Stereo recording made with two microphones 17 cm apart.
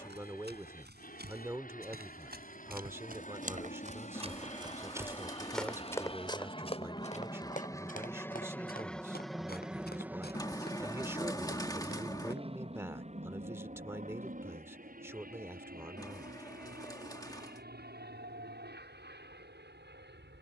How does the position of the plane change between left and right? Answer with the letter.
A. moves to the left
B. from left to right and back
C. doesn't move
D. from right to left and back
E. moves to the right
E.